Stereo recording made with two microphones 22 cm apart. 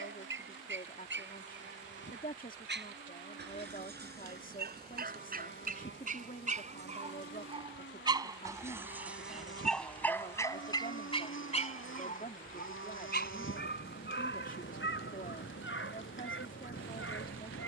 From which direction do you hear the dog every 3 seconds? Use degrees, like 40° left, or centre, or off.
60° right, 50° right, 20° right, 10° left, 50° left, 70° left.